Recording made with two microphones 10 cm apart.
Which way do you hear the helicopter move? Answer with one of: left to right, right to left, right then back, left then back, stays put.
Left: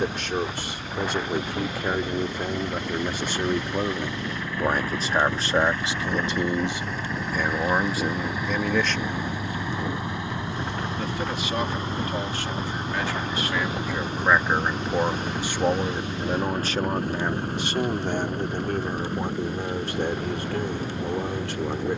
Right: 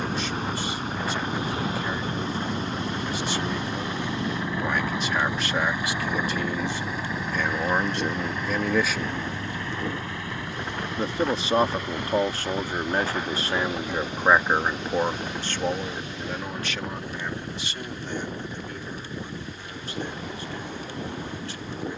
right to left.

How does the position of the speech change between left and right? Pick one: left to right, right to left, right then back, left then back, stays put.
right then back.